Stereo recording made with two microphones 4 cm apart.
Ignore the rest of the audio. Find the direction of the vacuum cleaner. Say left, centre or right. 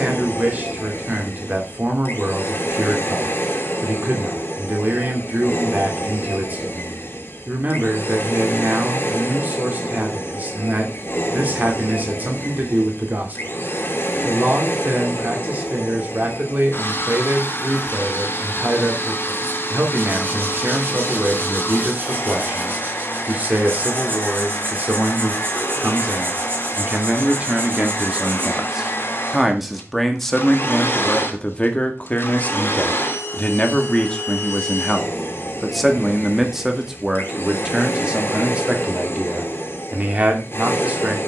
left.